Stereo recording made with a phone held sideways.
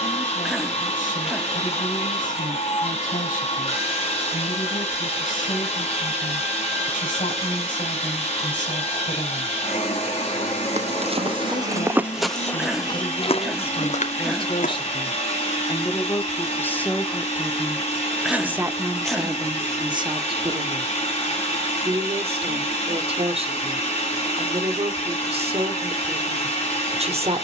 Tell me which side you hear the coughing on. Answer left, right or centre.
centre.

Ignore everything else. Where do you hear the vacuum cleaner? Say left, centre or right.
left.